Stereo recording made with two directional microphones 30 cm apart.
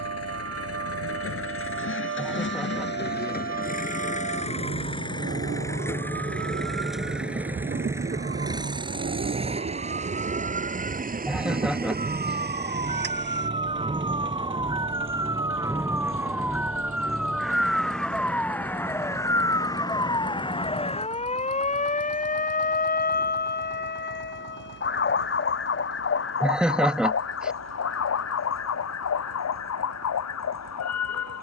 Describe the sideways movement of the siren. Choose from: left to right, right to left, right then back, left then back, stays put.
right to left.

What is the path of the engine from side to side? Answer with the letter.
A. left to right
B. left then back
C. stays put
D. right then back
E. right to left
A.